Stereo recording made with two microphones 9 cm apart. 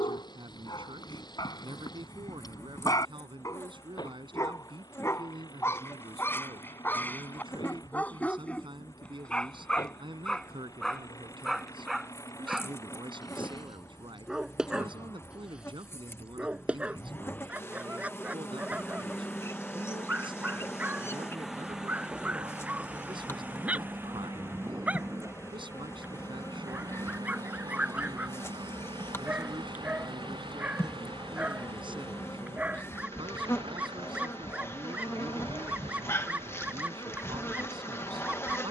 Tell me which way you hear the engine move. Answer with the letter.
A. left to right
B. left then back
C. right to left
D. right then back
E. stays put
A.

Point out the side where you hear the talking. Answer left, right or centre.
right.